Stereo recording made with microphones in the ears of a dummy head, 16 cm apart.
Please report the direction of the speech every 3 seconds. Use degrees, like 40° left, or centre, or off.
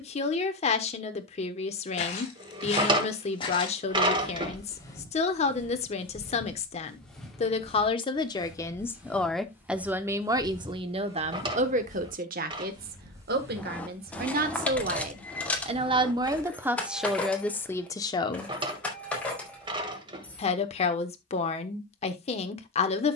40° left, 40° left, 30° left, 20° right, 50° right, 10° right, 30° left, 40° left.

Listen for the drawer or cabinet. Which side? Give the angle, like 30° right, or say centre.
30° right.